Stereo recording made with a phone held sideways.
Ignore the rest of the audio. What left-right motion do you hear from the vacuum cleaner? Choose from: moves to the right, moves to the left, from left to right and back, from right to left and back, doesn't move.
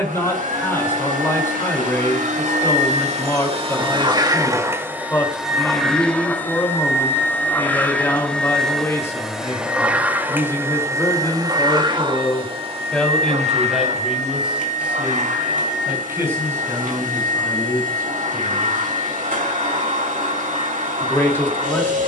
from right to left and back.